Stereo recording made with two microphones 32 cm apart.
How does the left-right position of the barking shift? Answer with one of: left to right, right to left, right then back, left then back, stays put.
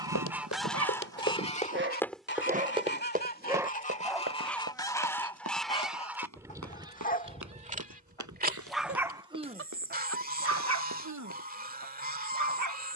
left then back.